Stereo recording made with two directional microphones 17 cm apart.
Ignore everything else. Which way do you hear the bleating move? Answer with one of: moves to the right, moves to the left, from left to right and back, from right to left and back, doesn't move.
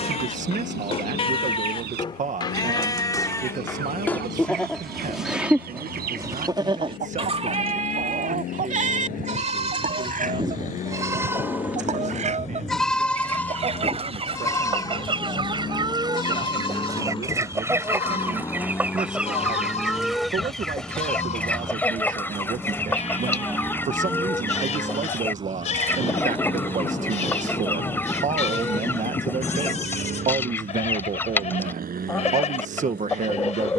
from left to right and back.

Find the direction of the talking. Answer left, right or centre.
right.